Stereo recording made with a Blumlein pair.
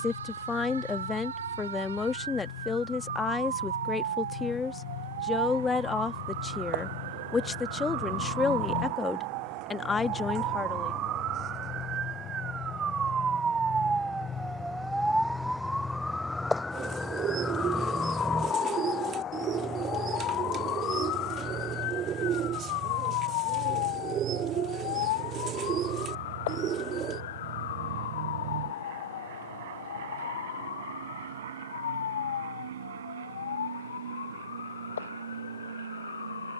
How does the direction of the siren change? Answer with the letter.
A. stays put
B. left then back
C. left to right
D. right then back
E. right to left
E.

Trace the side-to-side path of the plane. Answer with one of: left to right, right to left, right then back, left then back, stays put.
left to right.